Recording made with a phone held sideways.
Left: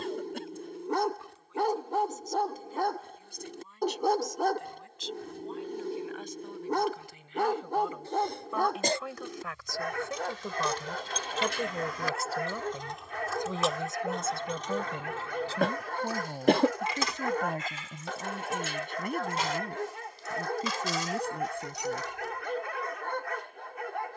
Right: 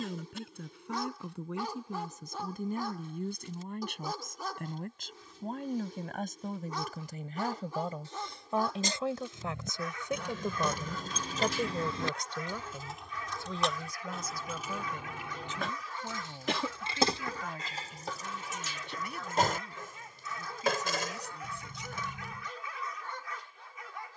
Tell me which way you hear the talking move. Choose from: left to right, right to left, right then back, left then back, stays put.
right to left.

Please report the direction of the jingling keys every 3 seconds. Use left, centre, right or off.
off, off, off, right, centre, right, right, right.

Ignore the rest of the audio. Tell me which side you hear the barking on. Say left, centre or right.
left.